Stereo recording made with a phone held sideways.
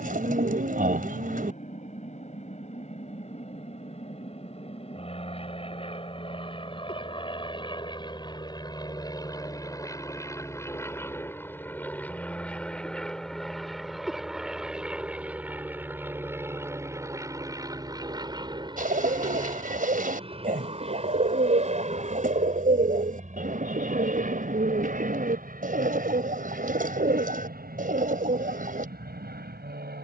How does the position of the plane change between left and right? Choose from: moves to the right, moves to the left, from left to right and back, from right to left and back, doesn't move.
moves to the right.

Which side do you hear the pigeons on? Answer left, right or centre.
right.